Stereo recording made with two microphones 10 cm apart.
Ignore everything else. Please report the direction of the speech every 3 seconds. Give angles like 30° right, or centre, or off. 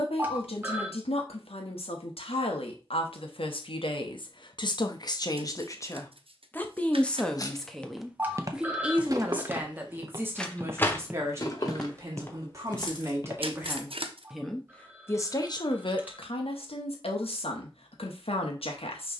80° left, 50° left, centre, 20° right, 20° right, 60° left, 80° left.